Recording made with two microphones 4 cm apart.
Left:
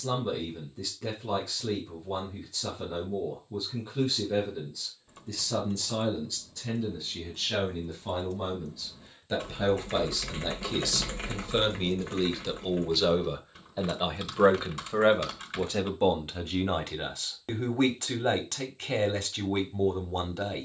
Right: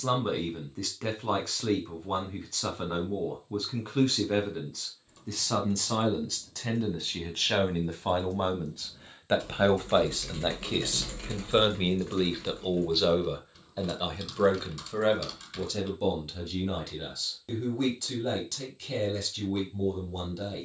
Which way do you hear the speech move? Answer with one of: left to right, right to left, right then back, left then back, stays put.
right to left.